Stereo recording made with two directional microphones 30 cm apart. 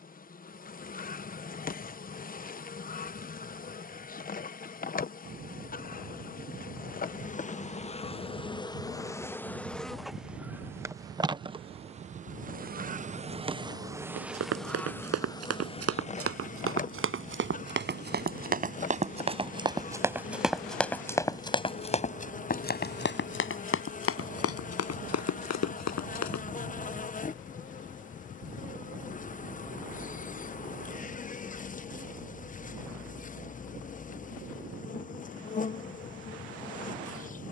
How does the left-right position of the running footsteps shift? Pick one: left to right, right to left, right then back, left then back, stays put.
right to left.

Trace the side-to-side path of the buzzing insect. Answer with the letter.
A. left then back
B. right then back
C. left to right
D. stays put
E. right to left
B.